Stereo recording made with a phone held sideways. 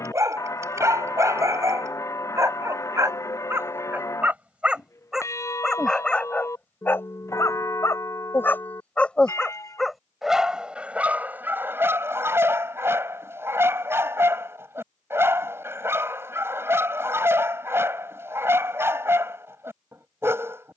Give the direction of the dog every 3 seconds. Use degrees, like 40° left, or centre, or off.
20° right, 10° right, 10° left, 10° right, 20° right, 20° right, 20° right.